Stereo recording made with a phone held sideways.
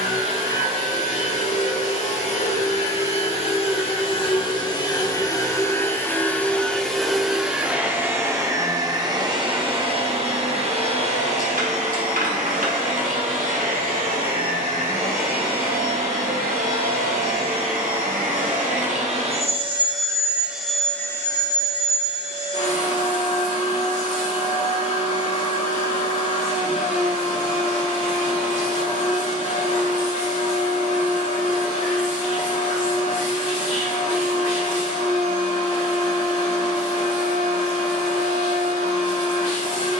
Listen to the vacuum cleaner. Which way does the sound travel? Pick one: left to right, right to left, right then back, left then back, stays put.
right then back.